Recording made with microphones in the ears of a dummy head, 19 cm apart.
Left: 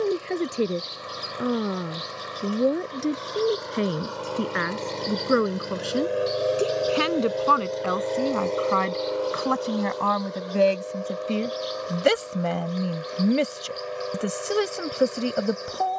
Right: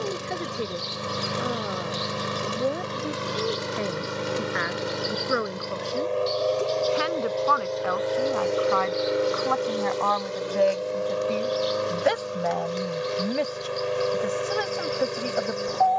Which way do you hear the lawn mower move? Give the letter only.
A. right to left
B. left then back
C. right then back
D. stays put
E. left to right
B.